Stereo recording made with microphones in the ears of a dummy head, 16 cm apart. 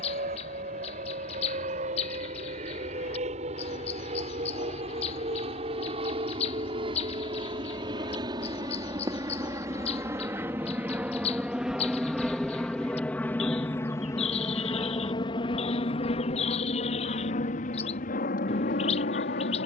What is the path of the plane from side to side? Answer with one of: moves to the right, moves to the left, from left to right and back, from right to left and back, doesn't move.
moves to the left.